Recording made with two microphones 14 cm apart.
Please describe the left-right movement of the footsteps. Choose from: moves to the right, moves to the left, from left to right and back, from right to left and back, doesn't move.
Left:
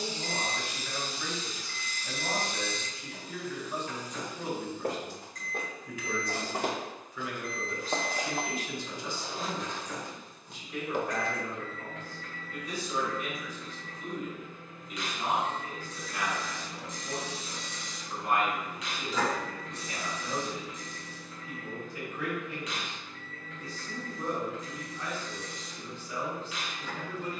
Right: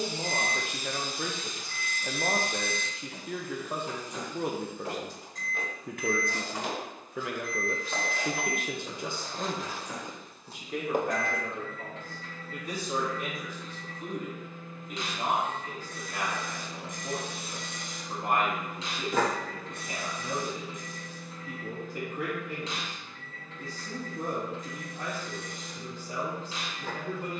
moves to the right.